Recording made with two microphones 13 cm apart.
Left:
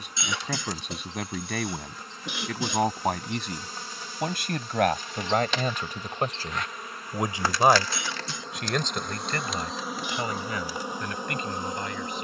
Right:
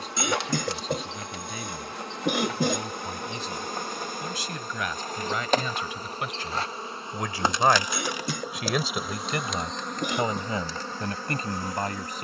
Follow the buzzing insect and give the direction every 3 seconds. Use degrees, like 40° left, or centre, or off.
70° right, 50° right, 20° right, 10° left.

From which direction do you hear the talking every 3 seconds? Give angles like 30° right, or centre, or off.
70° left, 60° left, 20° left, 30° right.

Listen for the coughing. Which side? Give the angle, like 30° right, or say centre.
50° right.